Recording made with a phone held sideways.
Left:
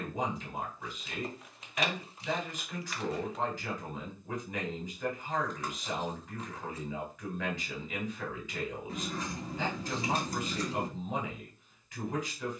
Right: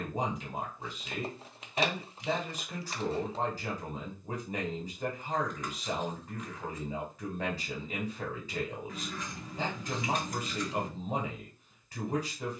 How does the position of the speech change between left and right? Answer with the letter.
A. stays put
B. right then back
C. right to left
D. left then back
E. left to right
A.